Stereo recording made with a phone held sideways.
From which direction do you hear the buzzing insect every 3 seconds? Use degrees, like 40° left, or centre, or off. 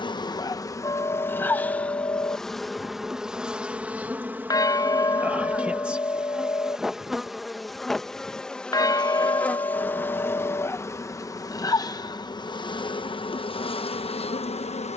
10° left, 10° right, centre, 20° left, 40° left.